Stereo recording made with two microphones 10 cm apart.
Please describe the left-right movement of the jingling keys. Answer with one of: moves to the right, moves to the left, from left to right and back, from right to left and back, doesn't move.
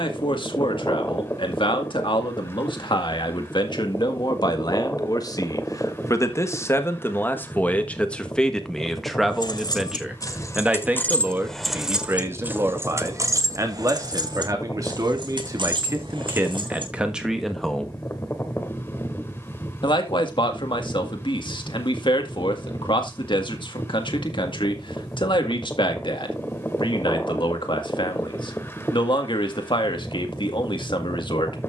moves to the right.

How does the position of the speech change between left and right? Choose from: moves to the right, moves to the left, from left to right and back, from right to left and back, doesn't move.
from left to right and back.